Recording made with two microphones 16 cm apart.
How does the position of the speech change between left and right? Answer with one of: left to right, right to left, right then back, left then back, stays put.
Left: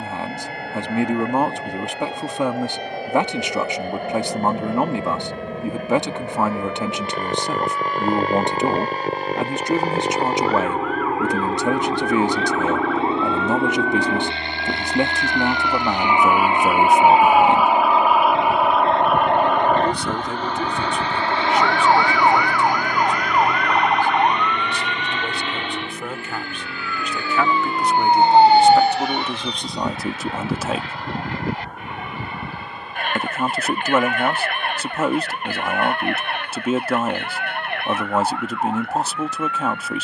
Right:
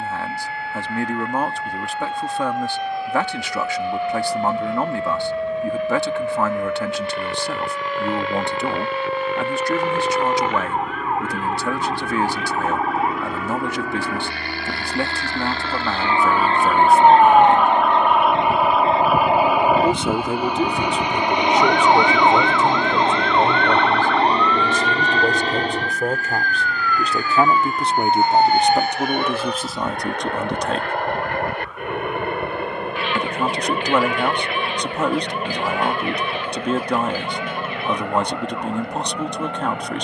right then back.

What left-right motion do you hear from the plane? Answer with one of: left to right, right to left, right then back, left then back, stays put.
left to right.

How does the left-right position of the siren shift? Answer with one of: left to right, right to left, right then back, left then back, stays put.
right to left.